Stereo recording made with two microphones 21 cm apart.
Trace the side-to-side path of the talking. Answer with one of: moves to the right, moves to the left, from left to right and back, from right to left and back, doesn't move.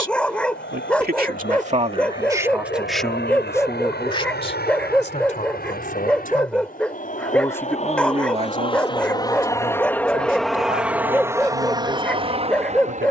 from right to left and back.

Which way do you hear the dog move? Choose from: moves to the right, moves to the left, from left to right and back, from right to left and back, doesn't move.
doesn't move.